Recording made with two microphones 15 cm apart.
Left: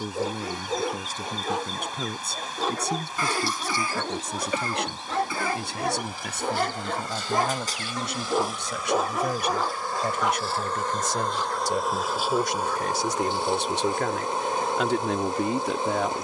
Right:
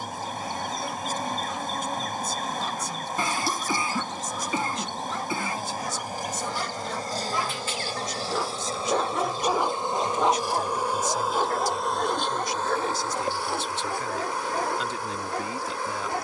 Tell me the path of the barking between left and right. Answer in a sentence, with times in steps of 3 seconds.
In this clip you hear the barking on the left from 0 s and on the right from 9 s.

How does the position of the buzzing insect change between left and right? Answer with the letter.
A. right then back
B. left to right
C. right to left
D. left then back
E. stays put
C.